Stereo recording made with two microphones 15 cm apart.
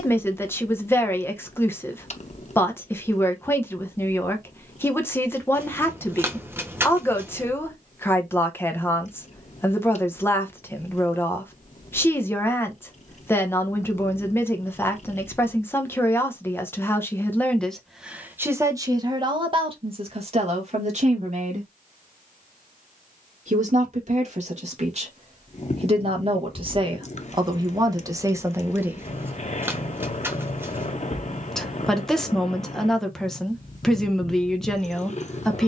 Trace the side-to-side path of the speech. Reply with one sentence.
In this clip you hear the speech move from left to right and back again.